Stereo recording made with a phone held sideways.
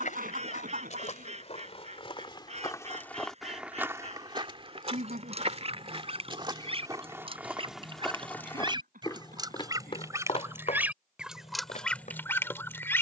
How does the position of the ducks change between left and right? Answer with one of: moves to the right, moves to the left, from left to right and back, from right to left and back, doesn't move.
moves to the left.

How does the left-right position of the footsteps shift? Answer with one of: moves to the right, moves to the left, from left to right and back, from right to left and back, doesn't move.
from left to right and back.